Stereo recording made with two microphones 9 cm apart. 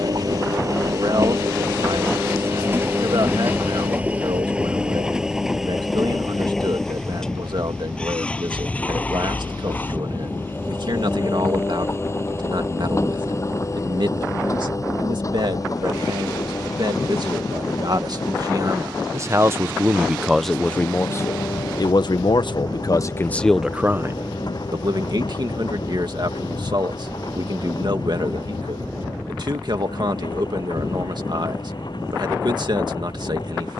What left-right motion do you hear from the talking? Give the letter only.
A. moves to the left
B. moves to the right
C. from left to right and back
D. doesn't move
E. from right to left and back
E.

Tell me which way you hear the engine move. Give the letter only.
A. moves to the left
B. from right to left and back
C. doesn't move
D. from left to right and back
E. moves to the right
A.